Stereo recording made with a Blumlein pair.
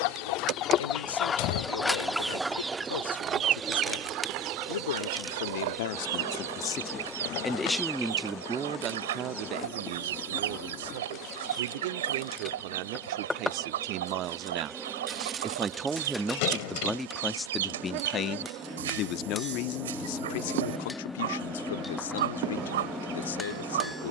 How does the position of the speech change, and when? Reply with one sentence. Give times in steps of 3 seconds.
In this clip you hear the speech on the left from 0 s, in the centre from 6 s, on the right from 9 s, in the centre from 15 s and on the left from 18 s.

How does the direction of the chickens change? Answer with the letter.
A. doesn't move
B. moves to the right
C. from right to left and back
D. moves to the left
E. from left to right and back
B.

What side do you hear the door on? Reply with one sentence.
In this clip you hear the door on the left.